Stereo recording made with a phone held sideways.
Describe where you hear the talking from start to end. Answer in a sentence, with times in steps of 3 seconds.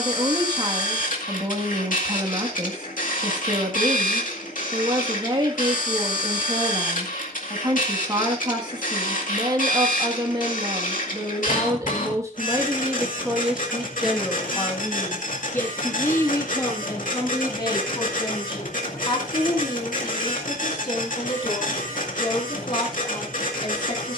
In this clip you hear the talking on the right from 0 s, in the centre from 12 s and on the left from 15 s.